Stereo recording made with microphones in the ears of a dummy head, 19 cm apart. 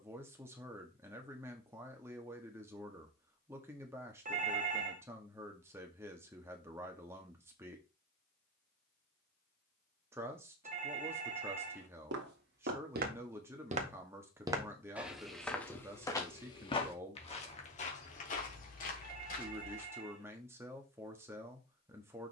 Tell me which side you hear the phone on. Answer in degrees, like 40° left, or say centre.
40° right.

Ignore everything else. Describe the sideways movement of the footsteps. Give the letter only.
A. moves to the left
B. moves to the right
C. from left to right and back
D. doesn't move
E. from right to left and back
A.